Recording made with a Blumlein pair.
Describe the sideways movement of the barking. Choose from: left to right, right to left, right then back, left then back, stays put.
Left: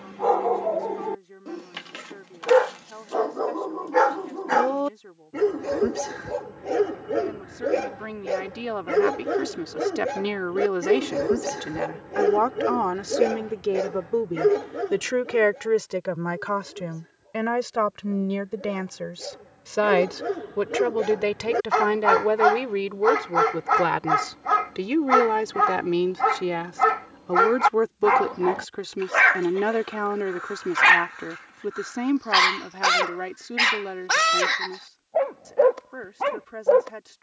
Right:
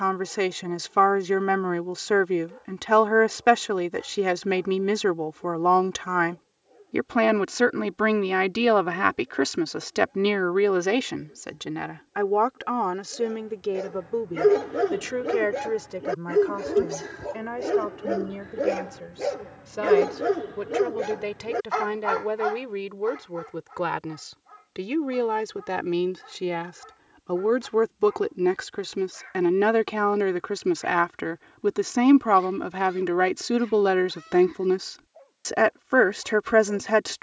right then back.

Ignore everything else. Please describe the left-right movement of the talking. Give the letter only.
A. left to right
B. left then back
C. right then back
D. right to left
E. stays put
B.